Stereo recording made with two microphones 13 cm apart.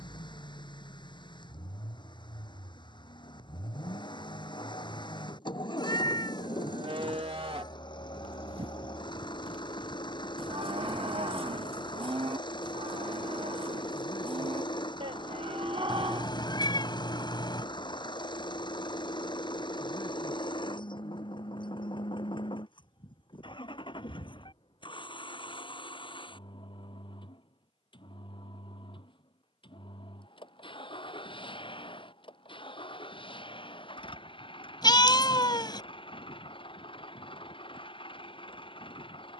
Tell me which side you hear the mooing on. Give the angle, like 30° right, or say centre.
40° right.